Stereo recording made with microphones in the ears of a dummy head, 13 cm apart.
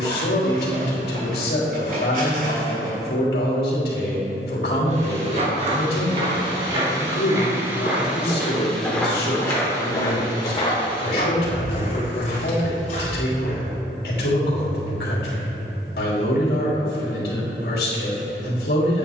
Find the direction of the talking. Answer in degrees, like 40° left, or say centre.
80° left.